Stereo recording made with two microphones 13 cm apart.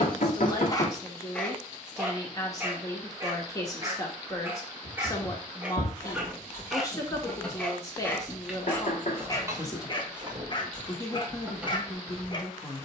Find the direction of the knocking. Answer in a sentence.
You can hear the knocking on the left.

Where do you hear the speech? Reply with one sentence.
In this clip you hear the speech on the left.